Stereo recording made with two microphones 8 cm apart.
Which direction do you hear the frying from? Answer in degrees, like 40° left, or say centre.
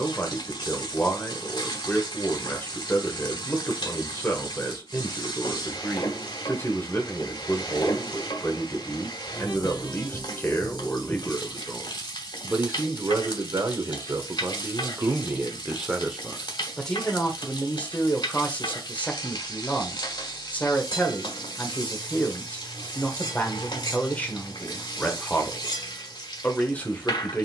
70° left.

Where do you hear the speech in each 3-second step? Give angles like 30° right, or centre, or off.
20° left, 20° left, 20° left, 20° left, 30° right, centre, 20° left, 20° left, 20° left.